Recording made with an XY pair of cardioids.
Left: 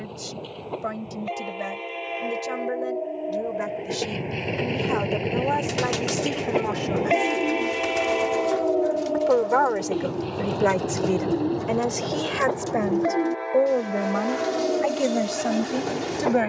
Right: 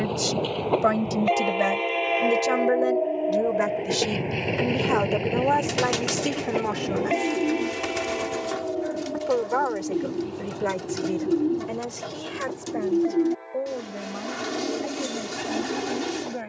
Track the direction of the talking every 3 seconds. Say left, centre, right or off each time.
right, right, centre, left, left, left.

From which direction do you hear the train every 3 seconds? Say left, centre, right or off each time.
right, centre, left, left, left, left.